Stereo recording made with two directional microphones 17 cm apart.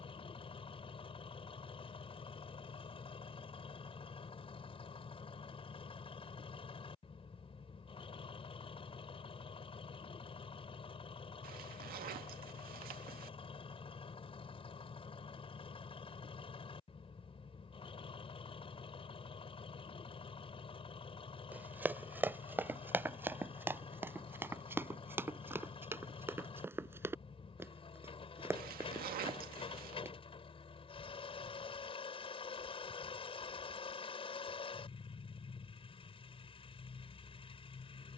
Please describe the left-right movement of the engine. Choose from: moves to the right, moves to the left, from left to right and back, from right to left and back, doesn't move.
doesn't move.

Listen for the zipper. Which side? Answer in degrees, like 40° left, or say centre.
60° right.